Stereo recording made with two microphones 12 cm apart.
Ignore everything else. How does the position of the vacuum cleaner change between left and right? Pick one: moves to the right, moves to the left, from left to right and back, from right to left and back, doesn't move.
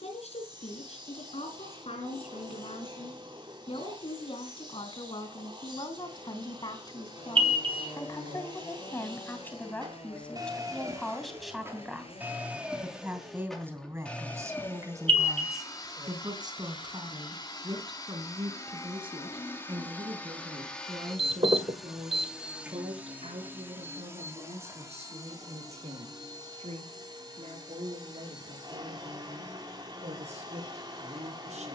from right to left and back.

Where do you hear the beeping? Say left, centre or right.
right.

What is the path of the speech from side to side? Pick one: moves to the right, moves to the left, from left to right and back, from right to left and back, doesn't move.
moves to the right.